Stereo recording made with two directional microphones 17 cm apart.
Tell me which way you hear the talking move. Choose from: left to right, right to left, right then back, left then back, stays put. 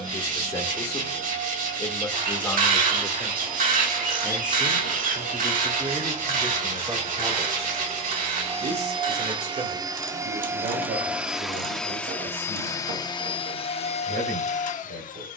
left to right.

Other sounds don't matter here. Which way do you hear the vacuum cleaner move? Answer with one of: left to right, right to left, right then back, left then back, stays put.
right to left.